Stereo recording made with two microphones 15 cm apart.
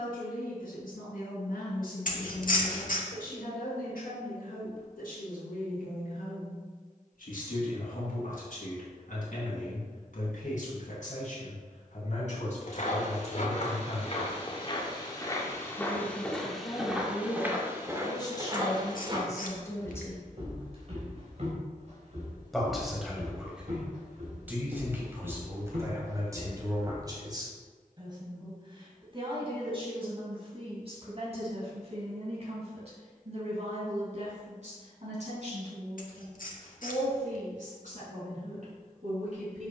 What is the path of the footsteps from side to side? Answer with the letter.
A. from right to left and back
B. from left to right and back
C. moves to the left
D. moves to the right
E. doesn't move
D.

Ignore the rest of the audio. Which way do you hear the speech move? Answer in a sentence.
You can hear the speech go from the left side to the right.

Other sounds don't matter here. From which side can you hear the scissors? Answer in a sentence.
You can hear the scissors on the left.